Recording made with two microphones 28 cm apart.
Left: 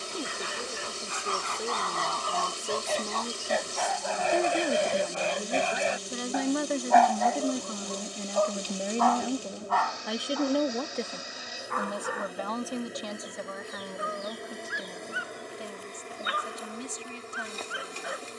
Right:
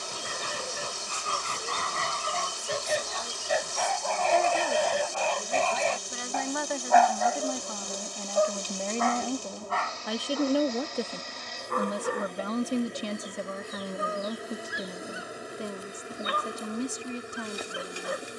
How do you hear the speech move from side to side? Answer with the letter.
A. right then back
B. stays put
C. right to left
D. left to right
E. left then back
D.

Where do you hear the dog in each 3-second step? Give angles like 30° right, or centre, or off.
40° right, 10° left, 10° right, 30° right, 50° right, 50° right.